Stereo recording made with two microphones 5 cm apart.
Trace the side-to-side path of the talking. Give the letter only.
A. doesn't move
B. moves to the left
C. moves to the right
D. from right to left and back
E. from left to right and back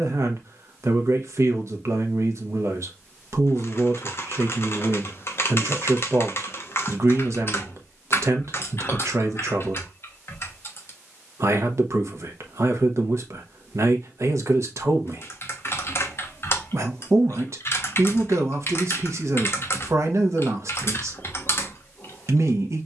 A.